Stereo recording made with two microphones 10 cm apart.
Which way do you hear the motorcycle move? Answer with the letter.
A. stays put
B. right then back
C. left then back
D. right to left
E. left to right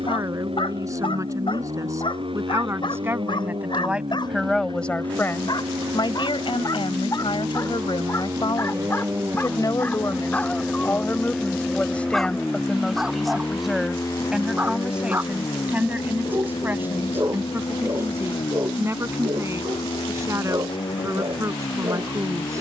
D.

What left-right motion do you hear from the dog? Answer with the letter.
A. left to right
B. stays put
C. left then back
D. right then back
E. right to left
A.